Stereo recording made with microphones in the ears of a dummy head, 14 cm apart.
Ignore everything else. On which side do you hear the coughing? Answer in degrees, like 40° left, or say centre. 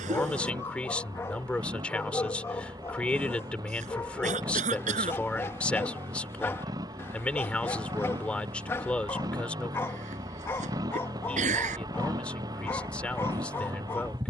50° right.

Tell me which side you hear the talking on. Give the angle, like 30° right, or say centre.
10° left.